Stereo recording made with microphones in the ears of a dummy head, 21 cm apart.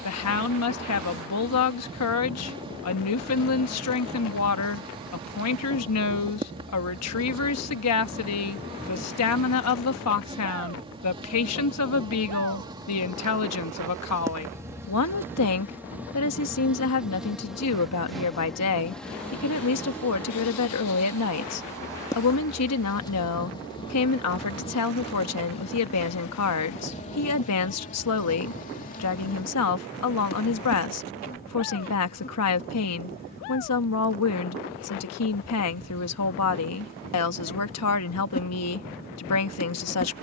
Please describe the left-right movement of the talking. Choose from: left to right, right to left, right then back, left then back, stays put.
stays put.